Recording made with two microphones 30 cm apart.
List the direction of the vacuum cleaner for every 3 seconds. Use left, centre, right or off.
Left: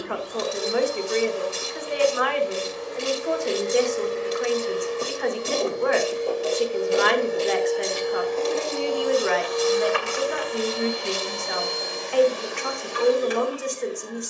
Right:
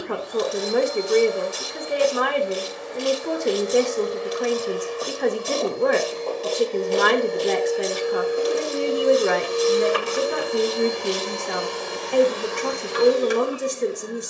left, left, centre, right, right.